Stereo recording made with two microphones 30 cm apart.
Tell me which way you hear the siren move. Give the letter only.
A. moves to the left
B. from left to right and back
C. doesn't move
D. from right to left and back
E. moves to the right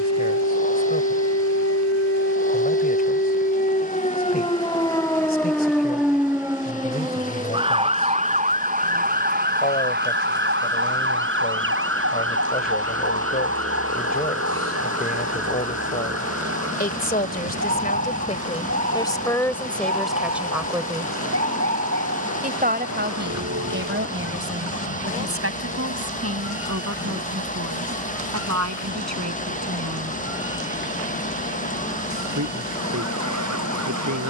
E.